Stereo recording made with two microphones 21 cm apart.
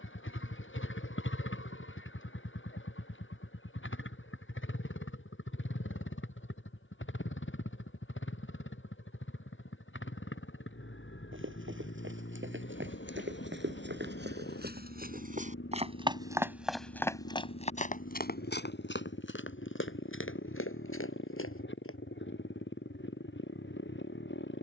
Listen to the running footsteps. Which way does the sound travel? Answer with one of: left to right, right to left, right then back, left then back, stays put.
right to left.